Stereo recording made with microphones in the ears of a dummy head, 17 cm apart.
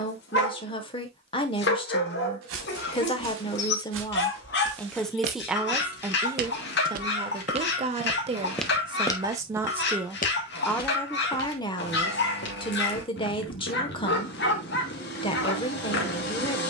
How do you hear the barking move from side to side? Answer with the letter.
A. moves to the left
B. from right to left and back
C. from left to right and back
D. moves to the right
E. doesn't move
E.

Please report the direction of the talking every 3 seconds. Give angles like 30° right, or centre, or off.
30° left, 10° left, 30° right, centre, 30° left, 30° left.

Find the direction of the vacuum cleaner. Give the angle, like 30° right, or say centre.
60° left.